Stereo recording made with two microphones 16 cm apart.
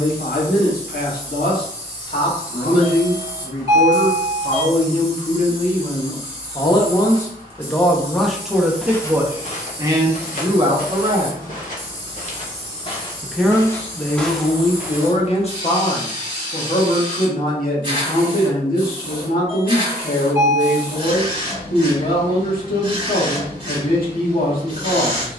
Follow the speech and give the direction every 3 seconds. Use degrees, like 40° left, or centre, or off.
70° left, 50° left, 10° left, 30° right, 10° left, 50° left, 70° left, 70° left, 70° left.